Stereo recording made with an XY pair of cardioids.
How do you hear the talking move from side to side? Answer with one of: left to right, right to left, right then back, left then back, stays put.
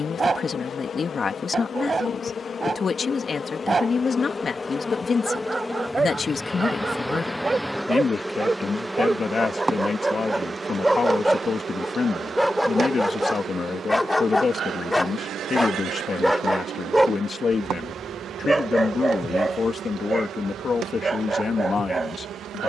stays put.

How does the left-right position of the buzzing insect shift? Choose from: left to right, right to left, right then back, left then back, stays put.
left to right.